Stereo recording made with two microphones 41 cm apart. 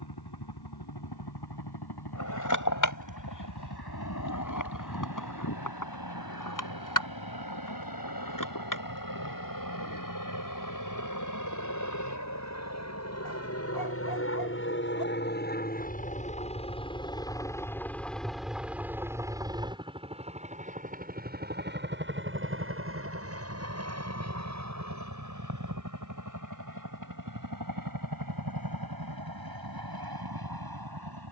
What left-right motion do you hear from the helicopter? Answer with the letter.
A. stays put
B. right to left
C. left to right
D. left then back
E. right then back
C.